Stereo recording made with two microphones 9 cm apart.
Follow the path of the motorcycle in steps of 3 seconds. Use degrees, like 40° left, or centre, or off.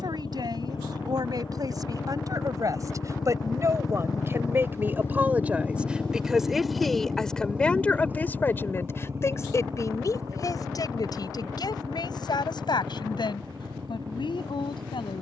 70° left, 30° left, 10° right, 40° right, 50° right.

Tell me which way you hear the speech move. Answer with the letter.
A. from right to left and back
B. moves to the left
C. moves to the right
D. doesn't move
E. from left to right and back
B.